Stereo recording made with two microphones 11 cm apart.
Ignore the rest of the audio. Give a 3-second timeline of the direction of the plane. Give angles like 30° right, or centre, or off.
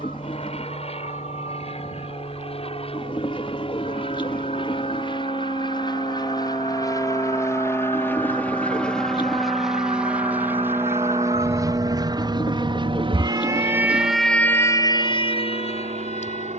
60° left, 50° left, 20° left, 10° right, 40° right, 60° right.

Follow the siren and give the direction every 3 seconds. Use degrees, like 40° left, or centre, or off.
80° right, 80° right, 70° right, 60° right, 20° right, 60° left.